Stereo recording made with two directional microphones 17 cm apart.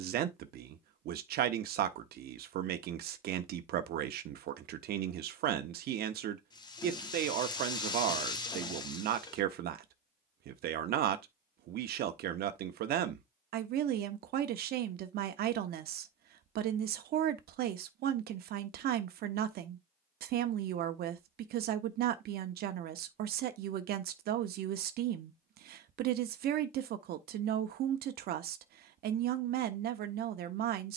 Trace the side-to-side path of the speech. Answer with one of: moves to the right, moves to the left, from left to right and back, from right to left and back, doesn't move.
doesn't move.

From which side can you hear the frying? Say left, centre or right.
left.